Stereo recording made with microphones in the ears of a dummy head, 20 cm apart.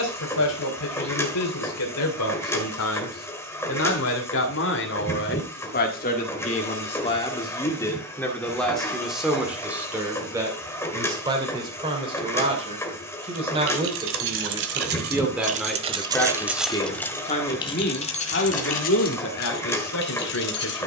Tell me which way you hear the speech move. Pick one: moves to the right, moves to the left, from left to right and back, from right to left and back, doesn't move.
from left to right and back.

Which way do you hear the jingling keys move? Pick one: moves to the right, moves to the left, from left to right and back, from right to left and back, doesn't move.
moves to the left.